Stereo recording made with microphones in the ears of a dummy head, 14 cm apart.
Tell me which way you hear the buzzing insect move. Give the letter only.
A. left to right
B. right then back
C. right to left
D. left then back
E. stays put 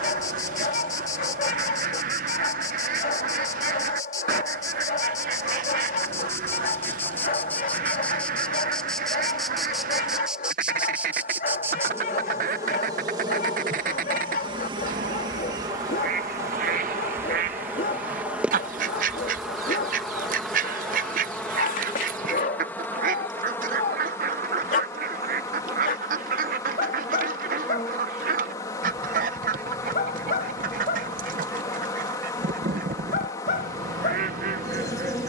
B.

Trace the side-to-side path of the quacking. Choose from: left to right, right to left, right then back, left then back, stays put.
stays put.